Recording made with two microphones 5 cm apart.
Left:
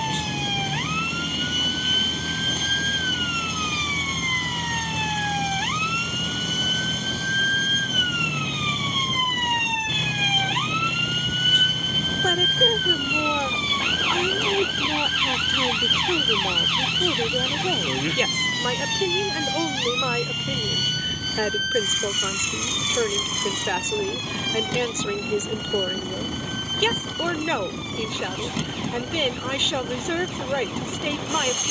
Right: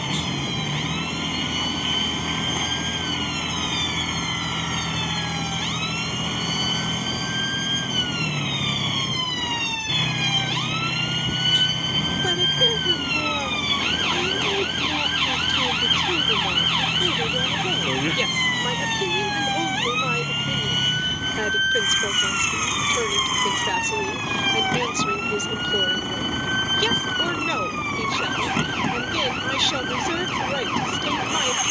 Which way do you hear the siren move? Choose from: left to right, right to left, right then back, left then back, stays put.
left to right.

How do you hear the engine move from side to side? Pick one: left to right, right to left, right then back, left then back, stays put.
stays put.